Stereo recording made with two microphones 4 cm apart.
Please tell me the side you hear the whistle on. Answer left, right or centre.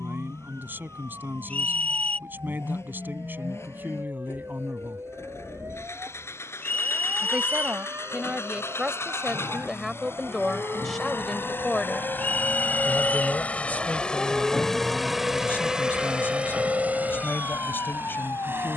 left.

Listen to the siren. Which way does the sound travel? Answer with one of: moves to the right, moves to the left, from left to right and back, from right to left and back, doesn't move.
moves to the left.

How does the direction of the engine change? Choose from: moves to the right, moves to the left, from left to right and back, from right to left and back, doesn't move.
moves to the right.